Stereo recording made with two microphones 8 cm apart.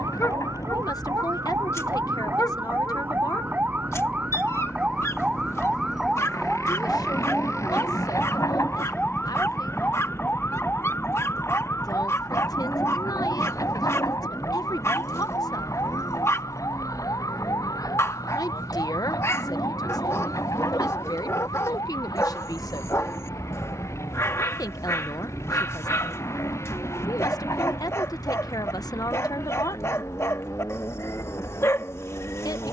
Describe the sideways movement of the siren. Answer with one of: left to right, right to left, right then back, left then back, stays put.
right to left.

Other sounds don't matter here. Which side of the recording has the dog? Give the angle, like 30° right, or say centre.
40° left.